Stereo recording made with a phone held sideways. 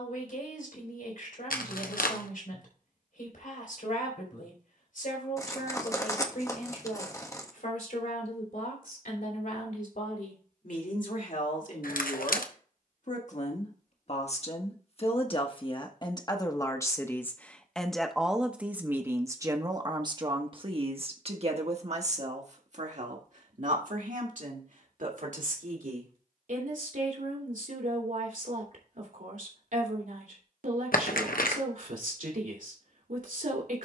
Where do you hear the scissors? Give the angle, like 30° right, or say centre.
20° left.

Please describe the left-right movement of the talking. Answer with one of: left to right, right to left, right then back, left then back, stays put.
left to right.